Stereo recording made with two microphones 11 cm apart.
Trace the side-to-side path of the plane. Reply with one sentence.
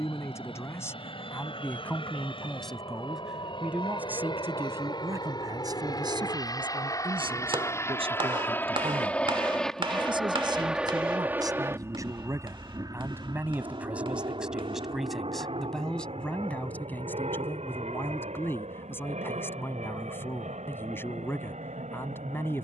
In this clip you hear the plane go from the left side to the right.